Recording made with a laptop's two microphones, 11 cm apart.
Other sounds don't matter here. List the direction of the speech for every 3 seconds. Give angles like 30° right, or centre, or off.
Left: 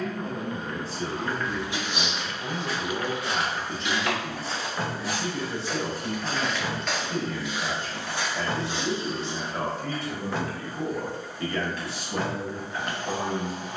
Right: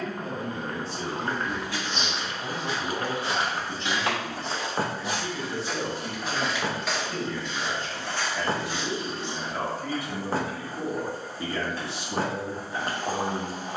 20° right, 10° left, 20° left, 10° right, 30° right.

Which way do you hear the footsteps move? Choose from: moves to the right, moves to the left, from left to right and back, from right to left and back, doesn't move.
from left to right and back.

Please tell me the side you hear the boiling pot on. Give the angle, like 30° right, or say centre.
40° right.